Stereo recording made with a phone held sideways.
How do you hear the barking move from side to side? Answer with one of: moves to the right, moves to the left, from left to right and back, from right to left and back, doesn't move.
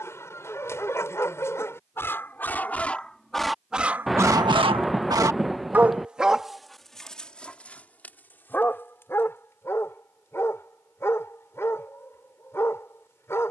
from left to right and back.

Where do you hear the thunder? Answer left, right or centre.
centre.